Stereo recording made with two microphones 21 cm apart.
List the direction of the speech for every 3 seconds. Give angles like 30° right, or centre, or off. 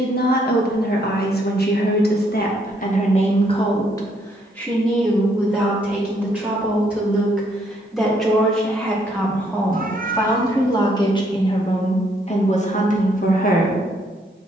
50° left, 10° left, centre, 20° left, 40° left.